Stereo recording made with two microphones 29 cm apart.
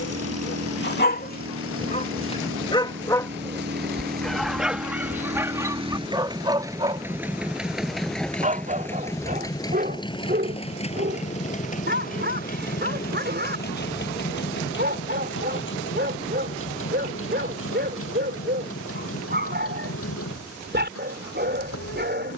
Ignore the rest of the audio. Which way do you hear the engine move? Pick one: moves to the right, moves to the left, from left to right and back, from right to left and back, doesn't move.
moves to the left.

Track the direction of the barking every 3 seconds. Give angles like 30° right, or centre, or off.
30° left, centre, 20° right, 30° right, 40° right, 40° right, 40° right, 40° right.